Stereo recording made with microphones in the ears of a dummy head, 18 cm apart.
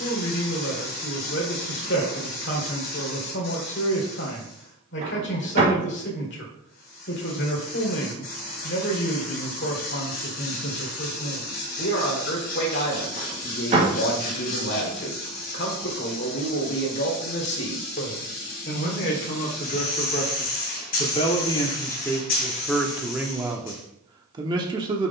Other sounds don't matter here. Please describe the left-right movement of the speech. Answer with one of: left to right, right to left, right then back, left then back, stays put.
left to right.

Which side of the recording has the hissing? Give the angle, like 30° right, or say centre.
50° left.